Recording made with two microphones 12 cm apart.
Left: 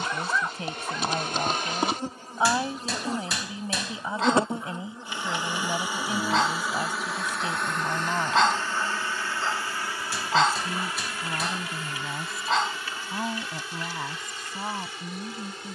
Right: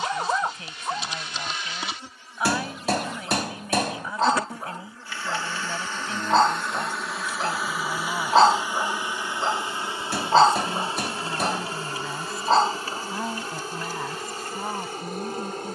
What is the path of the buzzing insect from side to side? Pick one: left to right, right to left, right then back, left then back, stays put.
left to right.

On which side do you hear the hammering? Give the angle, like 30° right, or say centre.
50° right.